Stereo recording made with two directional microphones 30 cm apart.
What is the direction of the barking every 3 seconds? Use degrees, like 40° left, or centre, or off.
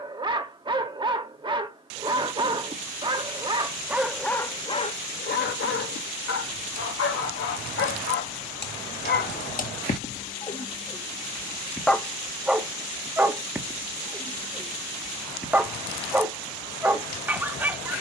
20° right, 10° left, 40° left, 20° left, 10° right, 10° right.